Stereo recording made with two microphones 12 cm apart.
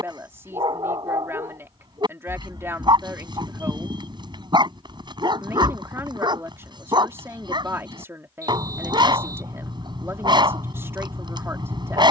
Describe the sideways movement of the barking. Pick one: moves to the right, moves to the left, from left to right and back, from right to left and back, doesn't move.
doesn't move.